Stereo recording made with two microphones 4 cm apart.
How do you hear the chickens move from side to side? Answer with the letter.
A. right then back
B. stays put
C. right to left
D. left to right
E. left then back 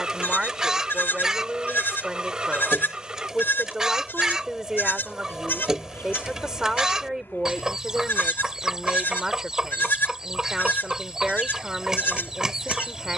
B.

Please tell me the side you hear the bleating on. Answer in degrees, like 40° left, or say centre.
60° left.